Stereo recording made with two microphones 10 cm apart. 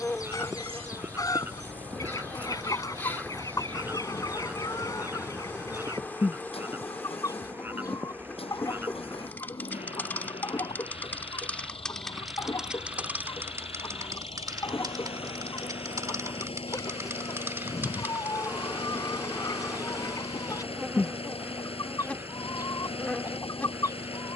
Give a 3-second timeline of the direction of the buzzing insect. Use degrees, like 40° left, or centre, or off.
20° left, 20° left, 20° left, 20° left, 20° right, 30° right, 10° right, 10° left.